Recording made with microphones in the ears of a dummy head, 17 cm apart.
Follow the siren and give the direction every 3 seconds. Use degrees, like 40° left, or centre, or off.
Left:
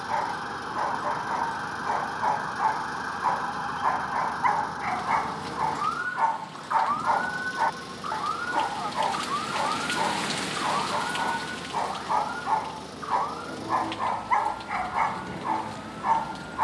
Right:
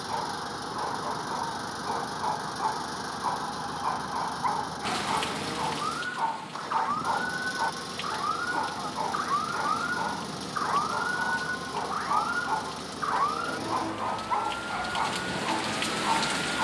50° left, 40° left, 10° left, 20° right, 40° right, 50° right.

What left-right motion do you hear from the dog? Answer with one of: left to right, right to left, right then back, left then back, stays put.
stays put.